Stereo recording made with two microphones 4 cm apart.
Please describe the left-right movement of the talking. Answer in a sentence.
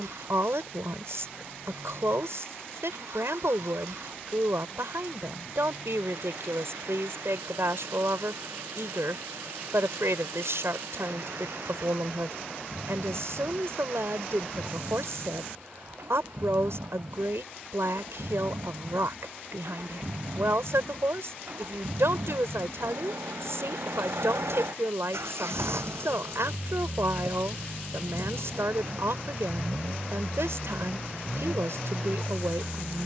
In this clip you hear the talking stay put.